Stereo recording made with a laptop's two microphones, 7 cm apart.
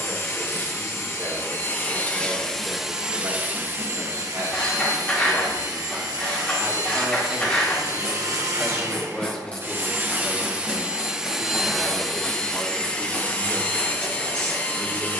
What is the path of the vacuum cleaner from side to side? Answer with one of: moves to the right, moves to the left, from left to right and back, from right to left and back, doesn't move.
from left to right and back.